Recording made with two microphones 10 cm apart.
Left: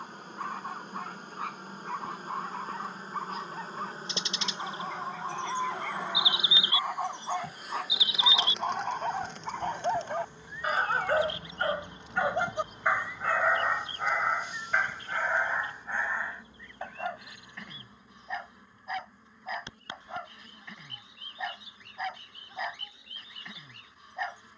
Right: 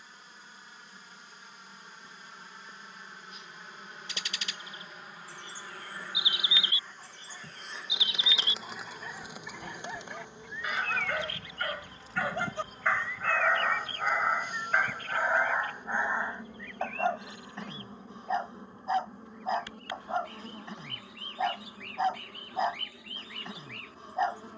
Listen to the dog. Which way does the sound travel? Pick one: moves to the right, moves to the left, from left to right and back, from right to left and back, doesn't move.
moves to the right.